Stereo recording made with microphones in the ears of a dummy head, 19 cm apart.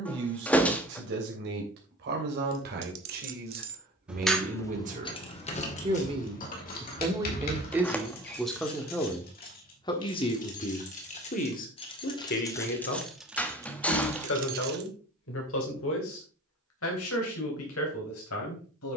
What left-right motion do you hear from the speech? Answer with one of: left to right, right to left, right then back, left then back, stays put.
right to left.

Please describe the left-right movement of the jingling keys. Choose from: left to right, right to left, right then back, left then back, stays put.
left then back.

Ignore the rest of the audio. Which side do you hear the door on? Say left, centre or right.
centre.